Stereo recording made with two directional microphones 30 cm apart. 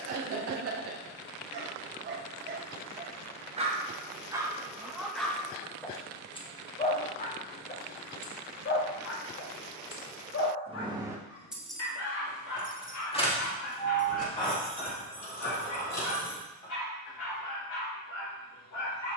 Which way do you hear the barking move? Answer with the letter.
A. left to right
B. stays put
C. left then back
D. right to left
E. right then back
D.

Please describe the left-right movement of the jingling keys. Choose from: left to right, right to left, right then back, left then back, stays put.
right to left.